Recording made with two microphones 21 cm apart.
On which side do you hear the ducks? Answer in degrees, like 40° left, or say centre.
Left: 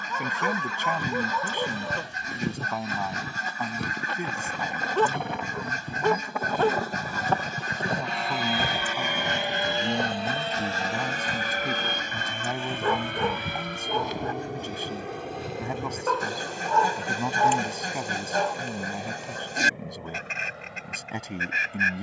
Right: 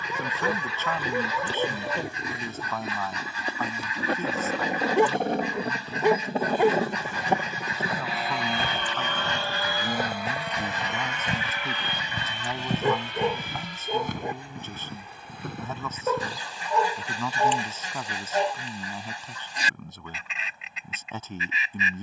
50° left.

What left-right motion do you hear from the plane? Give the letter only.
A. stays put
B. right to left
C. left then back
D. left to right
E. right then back
B.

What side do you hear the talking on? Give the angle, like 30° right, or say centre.
10° left.